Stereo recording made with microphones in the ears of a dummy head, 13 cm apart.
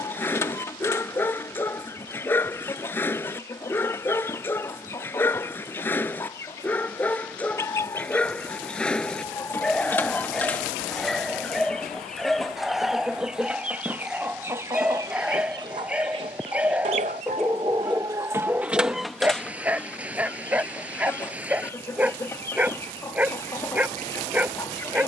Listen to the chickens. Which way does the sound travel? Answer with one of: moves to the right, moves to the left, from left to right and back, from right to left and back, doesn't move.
from left to right and back.